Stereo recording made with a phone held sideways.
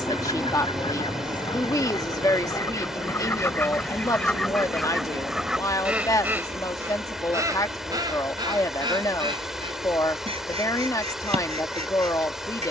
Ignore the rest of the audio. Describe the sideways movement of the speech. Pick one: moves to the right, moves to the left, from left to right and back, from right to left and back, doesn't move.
doesn't move.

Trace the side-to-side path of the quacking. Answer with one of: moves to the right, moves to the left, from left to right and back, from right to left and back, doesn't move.
moves to the right.